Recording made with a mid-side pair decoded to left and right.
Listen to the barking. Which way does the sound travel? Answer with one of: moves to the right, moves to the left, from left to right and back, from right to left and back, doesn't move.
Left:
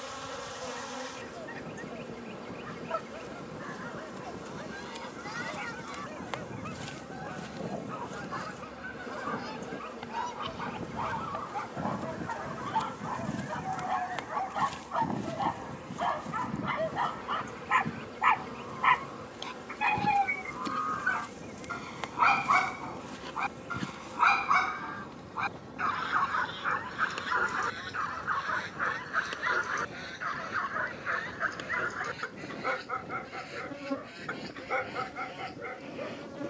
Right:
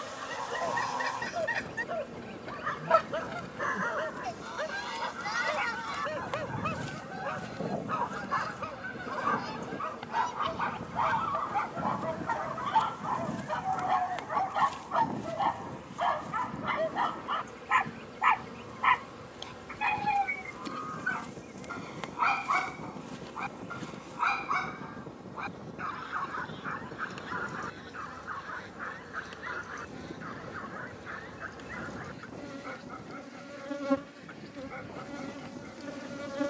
moves to the left.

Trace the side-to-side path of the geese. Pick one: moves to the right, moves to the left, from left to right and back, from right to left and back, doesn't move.
moves to the left.